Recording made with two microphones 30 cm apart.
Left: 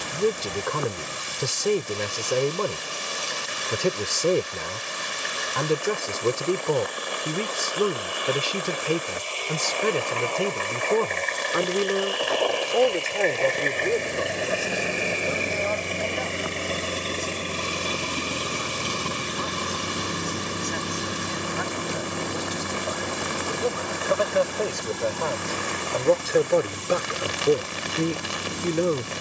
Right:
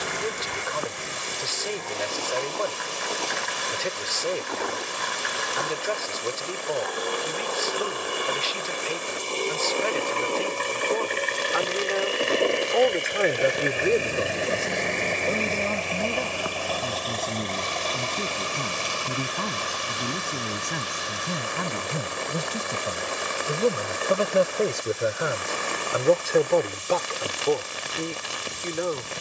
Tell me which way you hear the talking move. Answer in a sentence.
In this clip you hear the talking move from left to right and back again.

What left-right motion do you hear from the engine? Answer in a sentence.
In this clip you hear the engine move from right to left.